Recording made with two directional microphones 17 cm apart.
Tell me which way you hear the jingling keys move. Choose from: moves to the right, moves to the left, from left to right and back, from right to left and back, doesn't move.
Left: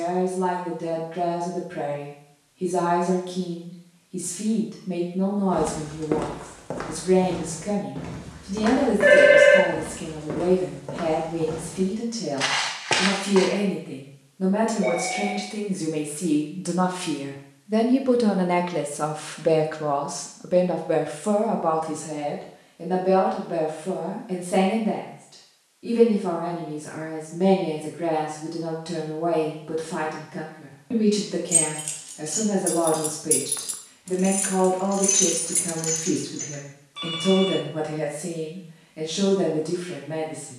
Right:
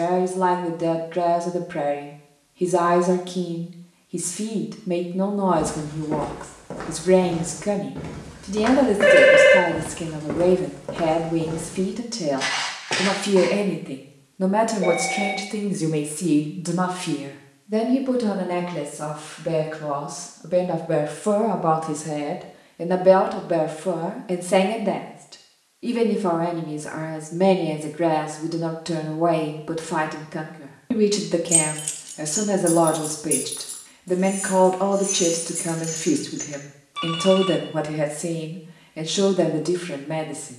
from right to left and back.